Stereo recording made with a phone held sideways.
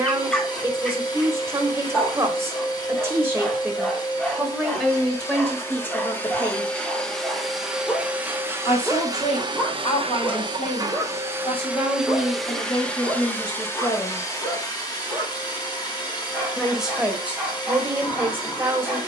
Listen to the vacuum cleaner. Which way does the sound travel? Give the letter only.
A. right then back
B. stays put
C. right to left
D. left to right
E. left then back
A.